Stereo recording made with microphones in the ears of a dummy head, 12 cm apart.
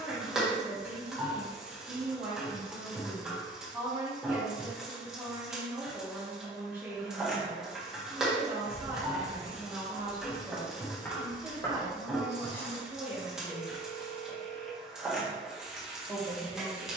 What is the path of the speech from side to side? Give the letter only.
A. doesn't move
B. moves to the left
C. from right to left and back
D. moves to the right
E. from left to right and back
A.